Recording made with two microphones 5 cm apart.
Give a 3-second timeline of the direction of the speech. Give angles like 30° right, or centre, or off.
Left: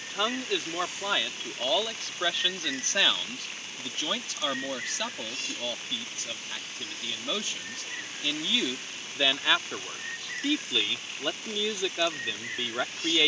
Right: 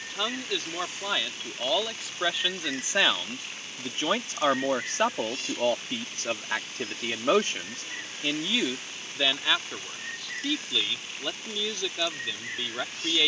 centre, 30° right, 40° right, 10° left, 10° left.